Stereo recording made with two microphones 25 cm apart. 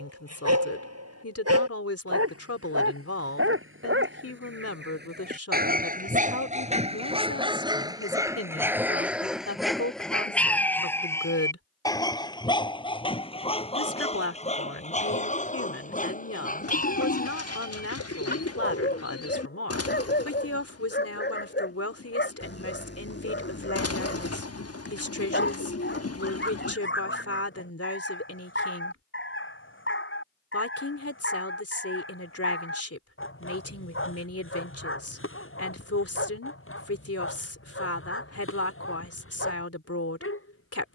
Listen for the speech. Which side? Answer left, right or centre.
left.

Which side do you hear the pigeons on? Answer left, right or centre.
left.